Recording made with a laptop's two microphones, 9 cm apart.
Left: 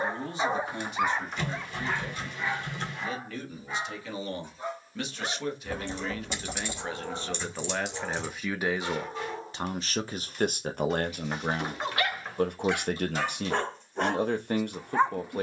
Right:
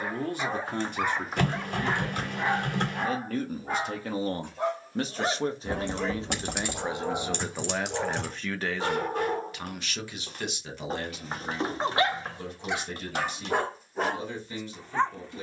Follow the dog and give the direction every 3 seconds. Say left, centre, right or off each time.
centre, right, right, right, centre.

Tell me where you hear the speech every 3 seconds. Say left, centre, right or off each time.
right, right, centre, left, left.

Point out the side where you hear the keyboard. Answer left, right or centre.
right.